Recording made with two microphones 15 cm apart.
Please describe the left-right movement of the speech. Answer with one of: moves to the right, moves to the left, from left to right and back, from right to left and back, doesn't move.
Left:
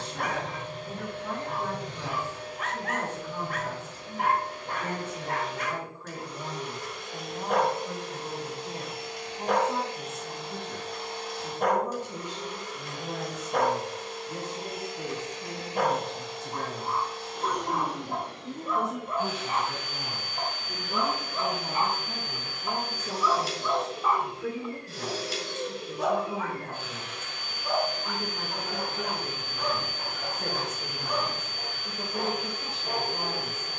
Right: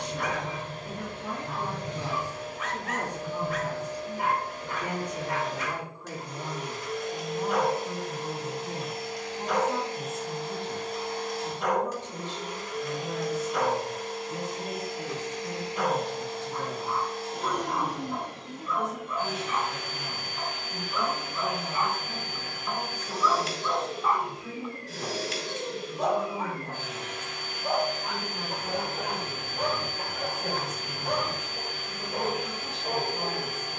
moves to the left.